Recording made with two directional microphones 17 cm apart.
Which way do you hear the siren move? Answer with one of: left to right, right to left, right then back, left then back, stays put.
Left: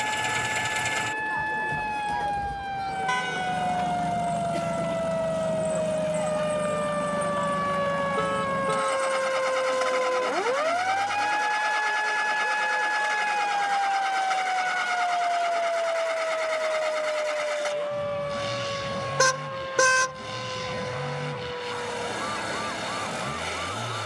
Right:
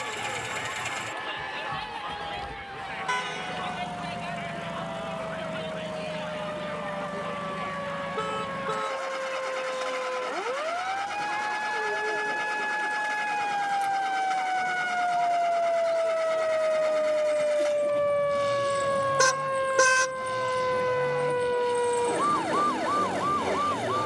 left to right.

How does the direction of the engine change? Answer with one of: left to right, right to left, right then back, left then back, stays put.
stays put.